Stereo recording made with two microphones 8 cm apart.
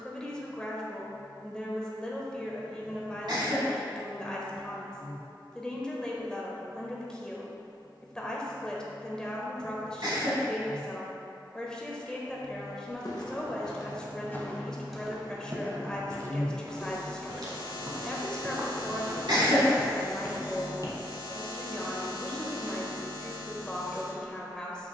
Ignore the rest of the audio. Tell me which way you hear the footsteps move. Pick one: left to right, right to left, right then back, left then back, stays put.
right then back.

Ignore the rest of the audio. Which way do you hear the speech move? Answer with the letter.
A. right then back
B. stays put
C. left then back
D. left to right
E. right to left
B.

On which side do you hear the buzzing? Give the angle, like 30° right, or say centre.
60° left.